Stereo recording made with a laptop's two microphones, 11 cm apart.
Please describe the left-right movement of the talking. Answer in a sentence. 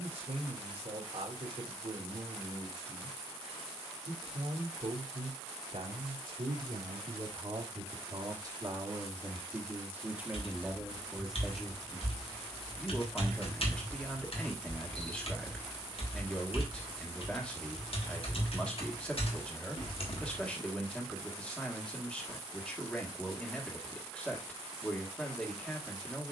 You can hear the talking travel towards the left.